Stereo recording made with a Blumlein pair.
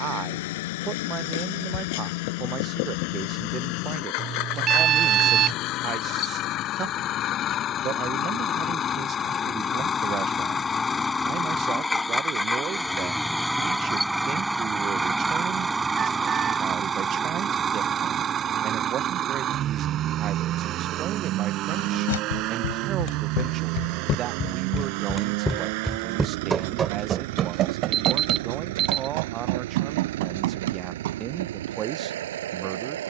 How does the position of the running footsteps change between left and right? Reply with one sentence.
You can hear the running footsteps move to the right.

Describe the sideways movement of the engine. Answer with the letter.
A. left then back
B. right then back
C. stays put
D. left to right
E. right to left
D.